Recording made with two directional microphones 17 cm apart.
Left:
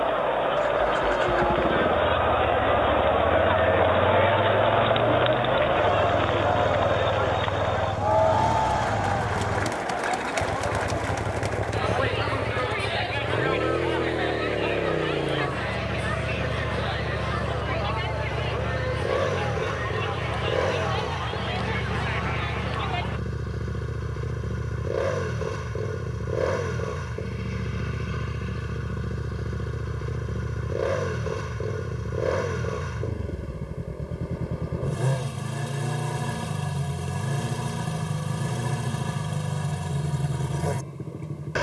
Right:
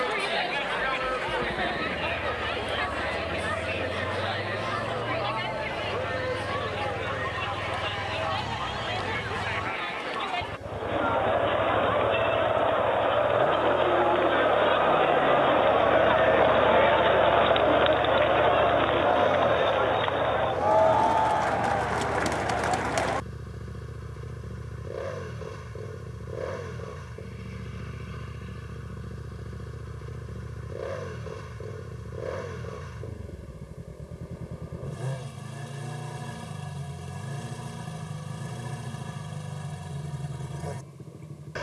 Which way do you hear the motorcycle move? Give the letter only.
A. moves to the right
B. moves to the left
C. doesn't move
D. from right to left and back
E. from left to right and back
C.